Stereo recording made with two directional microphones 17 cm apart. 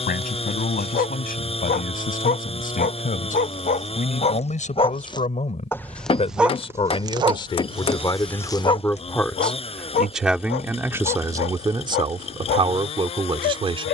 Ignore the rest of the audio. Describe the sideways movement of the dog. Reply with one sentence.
In this clip you hear the dog move from left to right and back again.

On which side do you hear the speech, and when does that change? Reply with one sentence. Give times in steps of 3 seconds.
You can hear the speech on the left from 0 s, in the centre from 9 s and on the right from 12 s.